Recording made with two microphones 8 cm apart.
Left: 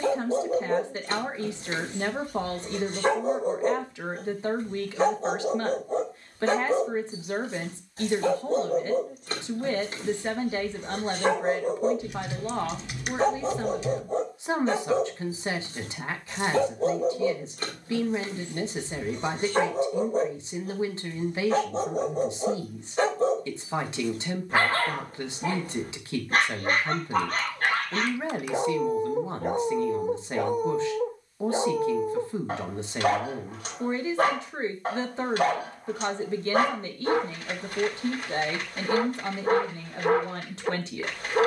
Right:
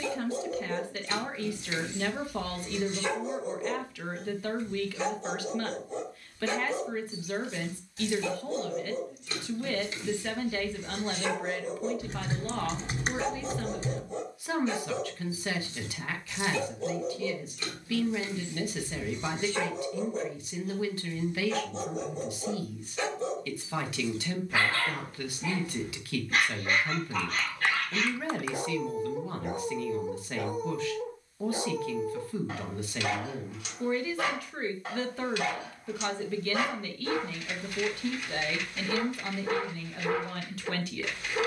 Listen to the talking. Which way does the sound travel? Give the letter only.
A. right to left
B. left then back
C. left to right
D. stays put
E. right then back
D.